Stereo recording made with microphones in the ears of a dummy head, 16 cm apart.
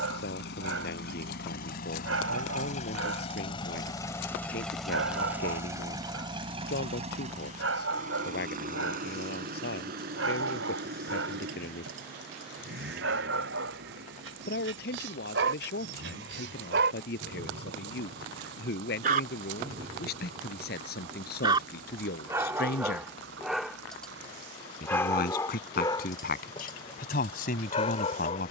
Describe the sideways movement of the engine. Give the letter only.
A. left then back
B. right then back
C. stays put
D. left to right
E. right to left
D.